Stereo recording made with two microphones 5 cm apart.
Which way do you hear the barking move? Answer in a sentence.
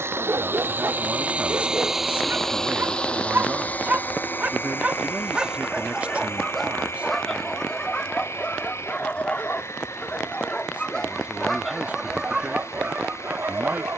You can hear the barking go left and come back.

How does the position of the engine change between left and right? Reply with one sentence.
In this clip you hear the engine move from right to left.